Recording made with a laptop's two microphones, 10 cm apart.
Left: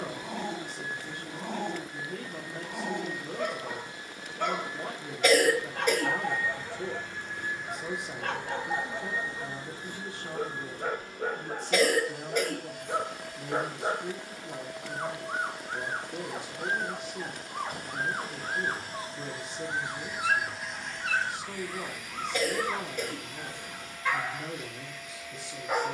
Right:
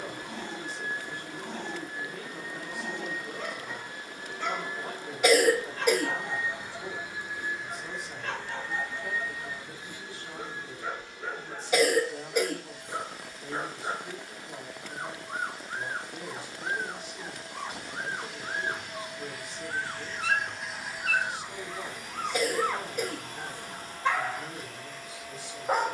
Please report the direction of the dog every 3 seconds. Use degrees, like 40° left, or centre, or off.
50° left, 50° left, 50° left, 50° left, 50° left, 50° left, 30° left, 10° right, 40° right.